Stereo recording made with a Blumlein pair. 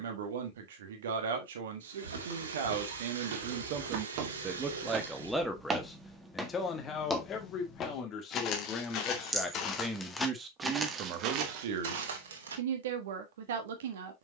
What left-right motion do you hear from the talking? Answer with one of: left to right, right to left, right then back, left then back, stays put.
left then back.